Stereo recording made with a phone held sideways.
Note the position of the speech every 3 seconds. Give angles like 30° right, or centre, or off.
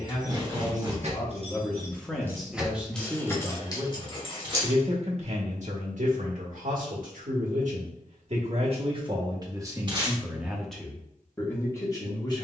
10° left, 40° right, 60° right, 10° right.